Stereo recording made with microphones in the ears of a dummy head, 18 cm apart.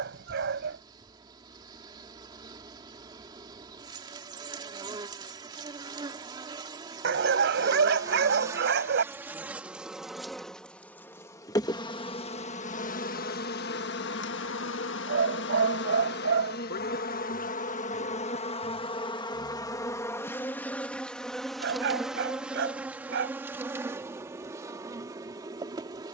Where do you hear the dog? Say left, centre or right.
right.